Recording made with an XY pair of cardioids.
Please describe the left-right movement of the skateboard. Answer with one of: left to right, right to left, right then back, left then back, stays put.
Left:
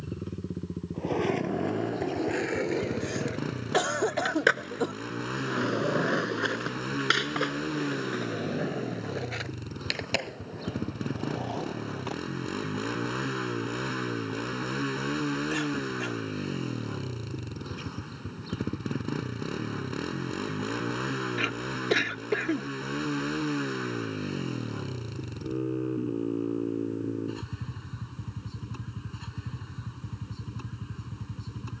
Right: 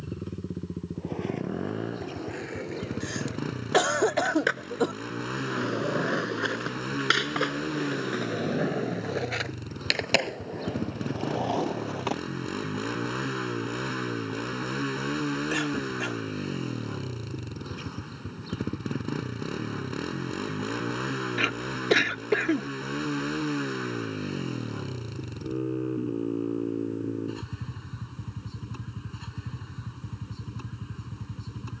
left to right.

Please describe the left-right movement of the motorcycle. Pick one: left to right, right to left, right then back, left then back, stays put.
stays put.